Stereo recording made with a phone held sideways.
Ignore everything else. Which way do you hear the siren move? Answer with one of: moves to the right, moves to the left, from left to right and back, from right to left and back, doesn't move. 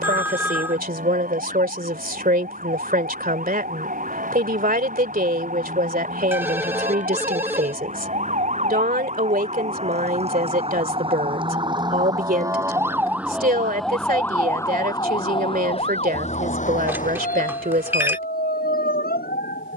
moves to the left.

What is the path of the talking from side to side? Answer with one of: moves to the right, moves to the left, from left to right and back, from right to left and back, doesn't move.
doesn't move.